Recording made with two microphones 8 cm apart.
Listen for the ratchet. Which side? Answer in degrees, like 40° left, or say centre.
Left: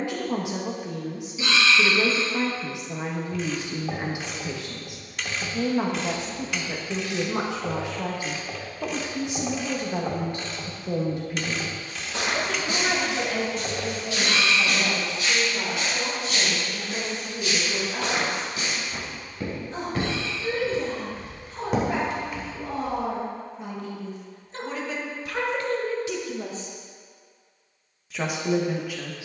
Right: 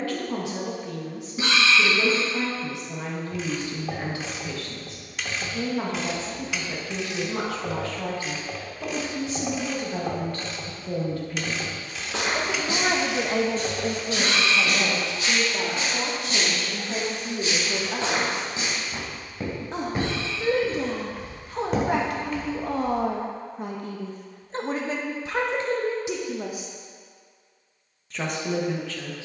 centre.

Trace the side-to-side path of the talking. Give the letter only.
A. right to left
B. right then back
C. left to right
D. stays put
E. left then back
B.